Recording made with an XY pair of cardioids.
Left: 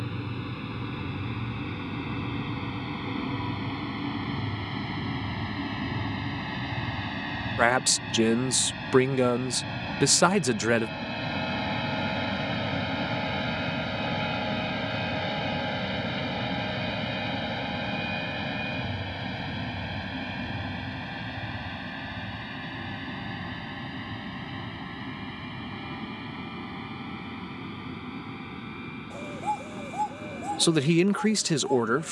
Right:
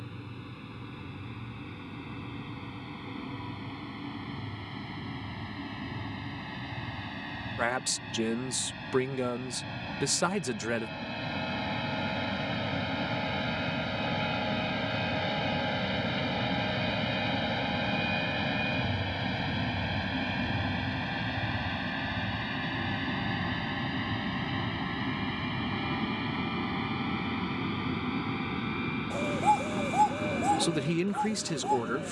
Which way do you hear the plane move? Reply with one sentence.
In this clip you hear the plane travel towards the right.